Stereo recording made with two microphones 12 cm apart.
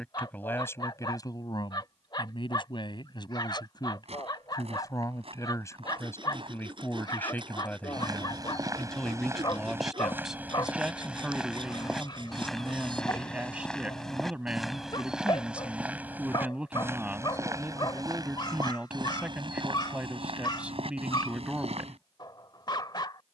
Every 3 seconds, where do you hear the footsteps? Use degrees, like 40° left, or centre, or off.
off, 50° right, 40° right, 10° right, centre, 20° right, 40° right, 60° right.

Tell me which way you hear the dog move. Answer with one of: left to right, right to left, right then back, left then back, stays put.
stays put.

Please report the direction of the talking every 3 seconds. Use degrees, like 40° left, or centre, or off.
30° left, 30° left, 10° left, centre, 10° right, 10° right, 10° right, 10° right.